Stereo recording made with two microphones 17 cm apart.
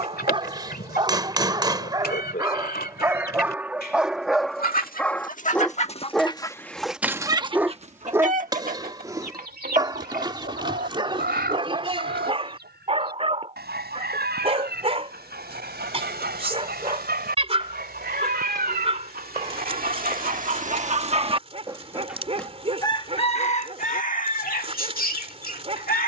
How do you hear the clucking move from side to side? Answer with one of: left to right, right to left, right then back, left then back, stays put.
right then back.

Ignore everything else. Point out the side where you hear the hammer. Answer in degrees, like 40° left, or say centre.
30° right.